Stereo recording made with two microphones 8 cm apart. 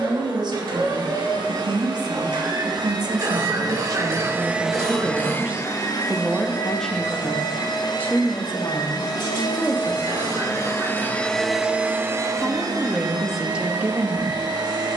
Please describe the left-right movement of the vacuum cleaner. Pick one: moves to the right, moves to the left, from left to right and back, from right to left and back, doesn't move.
from right to left and back.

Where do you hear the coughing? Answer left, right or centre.
right.